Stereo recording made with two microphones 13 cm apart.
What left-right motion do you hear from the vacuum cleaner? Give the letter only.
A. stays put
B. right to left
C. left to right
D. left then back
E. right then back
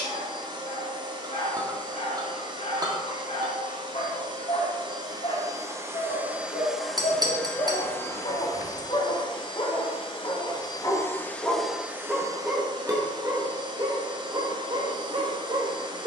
D.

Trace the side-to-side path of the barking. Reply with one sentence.
You can hear the barking move from left to right.